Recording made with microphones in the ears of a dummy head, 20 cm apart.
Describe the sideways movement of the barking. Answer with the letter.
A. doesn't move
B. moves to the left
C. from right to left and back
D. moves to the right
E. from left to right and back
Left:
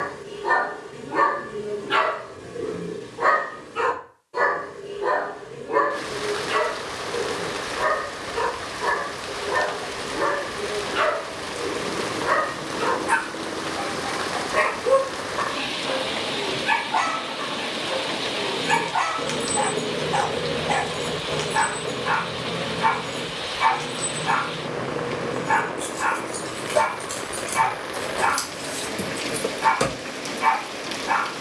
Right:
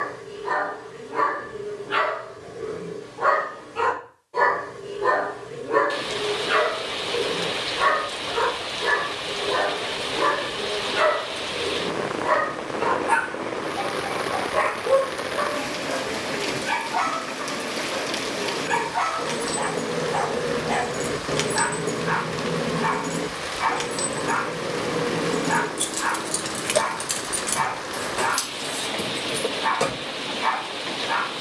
E.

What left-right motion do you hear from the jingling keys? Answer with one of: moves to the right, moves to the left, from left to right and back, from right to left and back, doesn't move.
from left to right and back.